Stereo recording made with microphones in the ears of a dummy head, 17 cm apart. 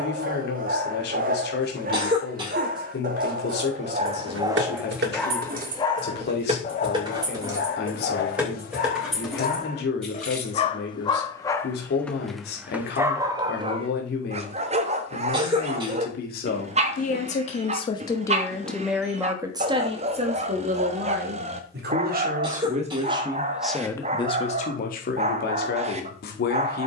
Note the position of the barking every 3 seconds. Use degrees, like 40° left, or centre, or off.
50° right, 20° right, 40° left, 30° left, 20° right, 30° right, 30° right, 30° right, 30° right.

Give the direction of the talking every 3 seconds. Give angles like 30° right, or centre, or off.
60° left, 60° left, 60° left, 60° left, 60° left, 50° left, 20° right, 30° right, 50° left.